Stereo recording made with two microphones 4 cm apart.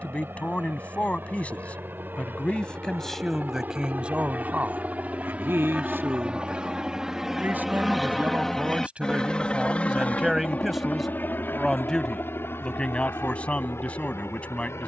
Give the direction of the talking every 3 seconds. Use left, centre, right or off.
left, right, right, centre, left.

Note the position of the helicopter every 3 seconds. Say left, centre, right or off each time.
right, right, centre, left, left.